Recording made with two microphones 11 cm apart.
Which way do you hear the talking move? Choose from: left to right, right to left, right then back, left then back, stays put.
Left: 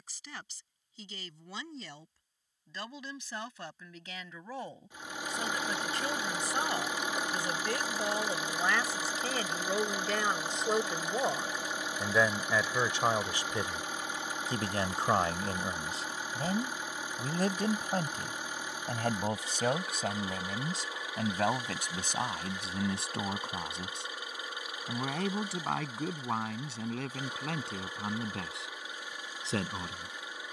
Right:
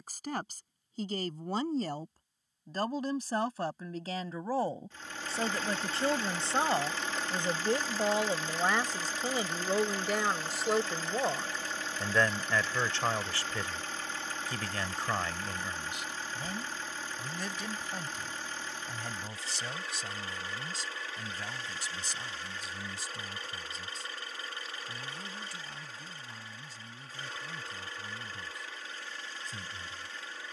right to left.